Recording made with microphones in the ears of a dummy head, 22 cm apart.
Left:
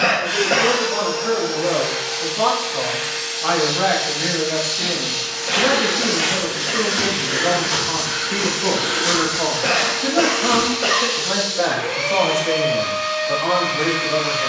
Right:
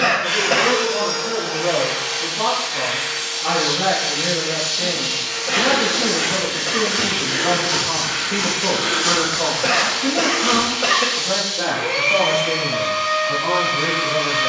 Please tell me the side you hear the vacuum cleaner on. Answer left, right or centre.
right.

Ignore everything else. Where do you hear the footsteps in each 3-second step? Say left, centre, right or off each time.
off, left, centre, right, off.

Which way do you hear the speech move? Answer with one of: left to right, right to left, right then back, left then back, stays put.
right then back.